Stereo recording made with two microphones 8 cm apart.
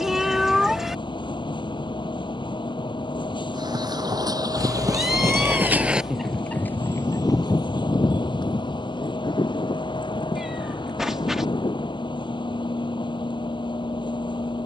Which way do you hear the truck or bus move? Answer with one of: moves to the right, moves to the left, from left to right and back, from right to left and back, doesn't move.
doesn't move.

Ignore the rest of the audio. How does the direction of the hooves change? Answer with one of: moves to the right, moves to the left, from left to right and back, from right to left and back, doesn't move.
moves to the left.